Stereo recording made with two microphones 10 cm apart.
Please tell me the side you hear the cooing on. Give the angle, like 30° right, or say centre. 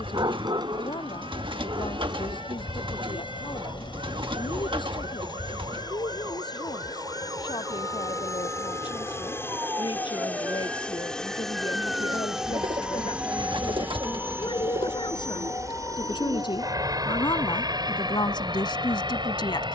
60° right.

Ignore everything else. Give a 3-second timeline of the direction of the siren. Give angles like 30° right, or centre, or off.
70° right, 60° right, 50° right, 20° right, 10° left, 40° left, 50° left.